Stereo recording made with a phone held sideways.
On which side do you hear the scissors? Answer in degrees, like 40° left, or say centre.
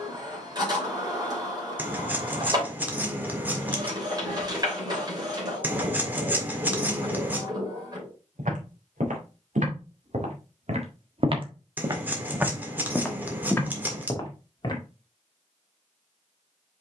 10° right.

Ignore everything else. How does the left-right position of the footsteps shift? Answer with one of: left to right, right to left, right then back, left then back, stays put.
right to left.